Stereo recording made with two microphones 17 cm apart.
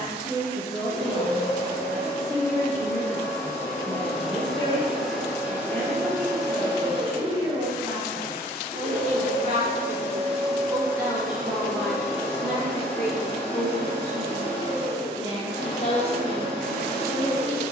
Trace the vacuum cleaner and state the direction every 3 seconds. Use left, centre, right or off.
left, centre, right, right, left, left.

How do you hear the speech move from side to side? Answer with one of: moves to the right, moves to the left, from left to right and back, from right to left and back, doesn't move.
from left to right and back.